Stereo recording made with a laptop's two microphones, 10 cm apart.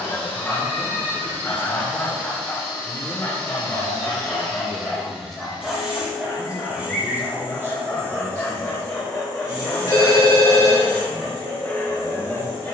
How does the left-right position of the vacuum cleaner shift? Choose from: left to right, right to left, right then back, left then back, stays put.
left to right.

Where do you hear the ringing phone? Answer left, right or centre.
left.